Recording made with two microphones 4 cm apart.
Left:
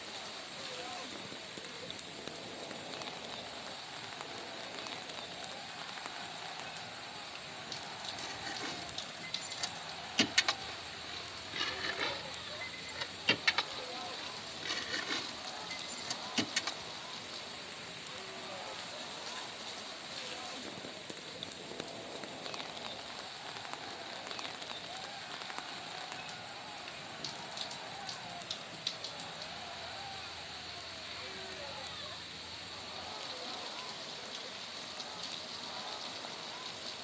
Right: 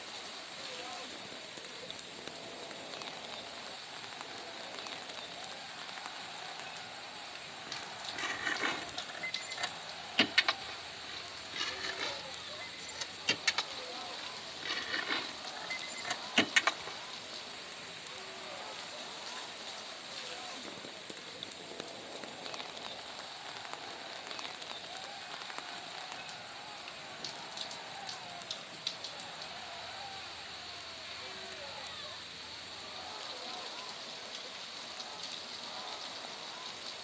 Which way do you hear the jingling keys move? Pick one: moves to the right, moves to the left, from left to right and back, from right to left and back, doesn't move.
from right to left and back.